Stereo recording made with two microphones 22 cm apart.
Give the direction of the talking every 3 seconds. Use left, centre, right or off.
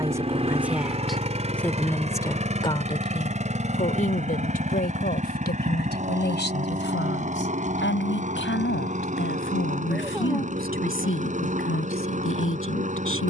centre, left, left, left, left.